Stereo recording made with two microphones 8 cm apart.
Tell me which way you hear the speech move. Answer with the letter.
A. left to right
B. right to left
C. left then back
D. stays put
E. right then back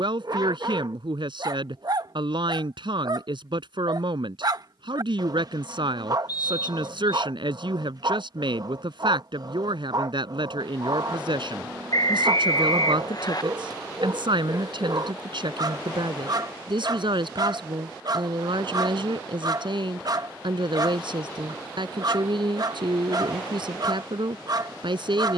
D.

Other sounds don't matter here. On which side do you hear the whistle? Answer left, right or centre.
left.